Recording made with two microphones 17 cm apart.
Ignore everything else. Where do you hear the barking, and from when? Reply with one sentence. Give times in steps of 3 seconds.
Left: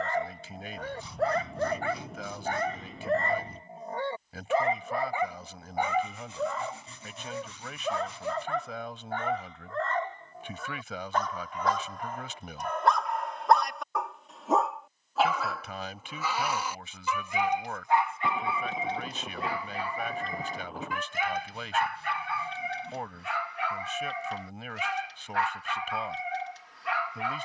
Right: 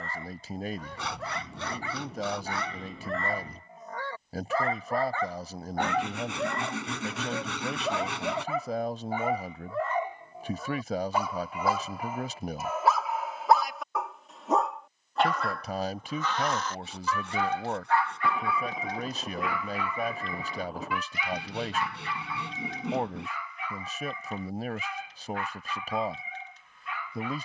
In this clip you hear the barking on the left from 0 s, in the centre from 6 s and on the left from 18 s.